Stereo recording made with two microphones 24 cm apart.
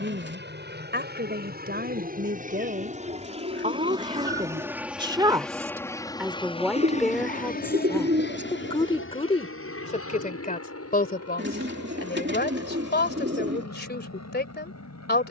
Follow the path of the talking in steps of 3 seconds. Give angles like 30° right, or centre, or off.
40° right, 20° right, 10° left, 30° left, 40° left.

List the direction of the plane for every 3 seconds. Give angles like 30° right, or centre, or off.
40° right, 10° right, 30° left, 60° left, 70° left.